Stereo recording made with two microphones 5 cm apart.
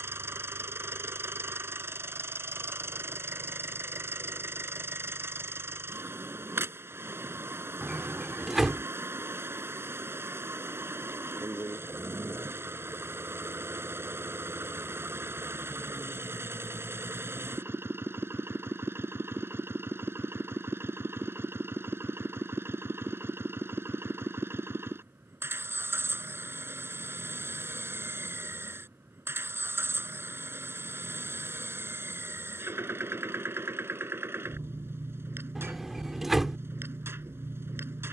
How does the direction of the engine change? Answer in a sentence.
In this clip you hear the engine stay put.